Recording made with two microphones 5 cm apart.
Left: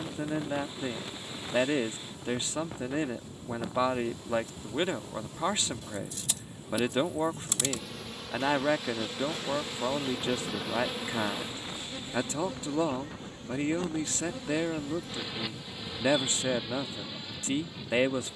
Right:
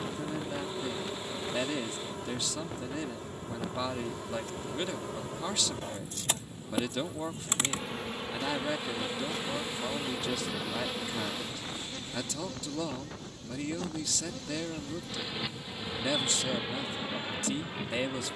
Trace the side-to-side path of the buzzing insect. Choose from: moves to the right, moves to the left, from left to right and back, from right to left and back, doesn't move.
from right to left and back.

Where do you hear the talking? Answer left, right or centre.
left.